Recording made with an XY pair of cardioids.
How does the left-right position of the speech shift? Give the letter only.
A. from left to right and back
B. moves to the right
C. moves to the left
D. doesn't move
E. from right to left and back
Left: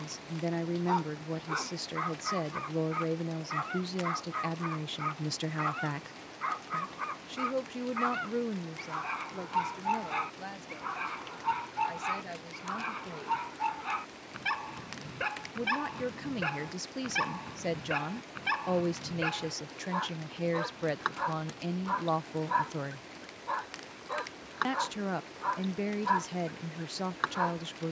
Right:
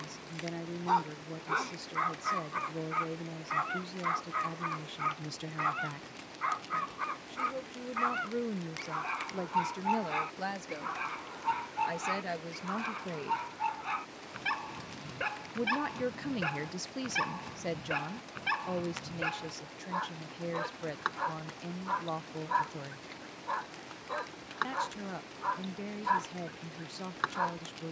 A.